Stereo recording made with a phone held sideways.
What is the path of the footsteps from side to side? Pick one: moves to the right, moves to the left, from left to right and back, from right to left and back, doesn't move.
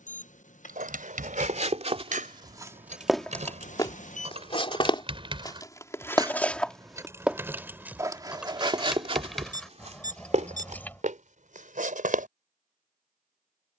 from right to left and back.